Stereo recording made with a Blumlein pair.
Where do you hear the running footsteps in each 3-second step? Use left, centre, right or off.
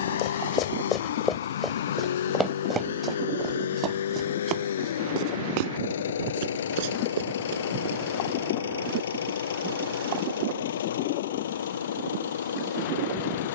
centre, right, right, off, off.